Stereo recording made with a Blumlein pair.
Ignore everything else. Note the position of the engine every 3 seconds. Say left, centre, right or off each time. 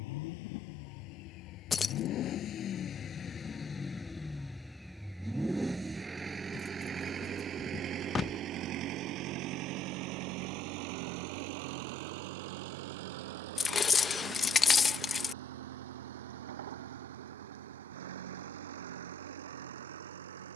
left, centre, right, right, right, right, right.